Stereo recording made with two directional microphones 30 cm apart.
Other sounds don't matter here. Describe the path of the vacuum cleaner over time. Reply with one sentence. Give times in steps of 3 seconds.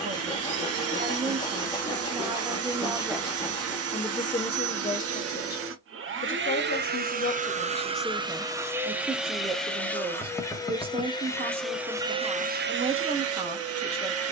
In this clip you hear the vacuum cleaner on the right from 0 s, in the centre from 9 s and on the right from 12 s.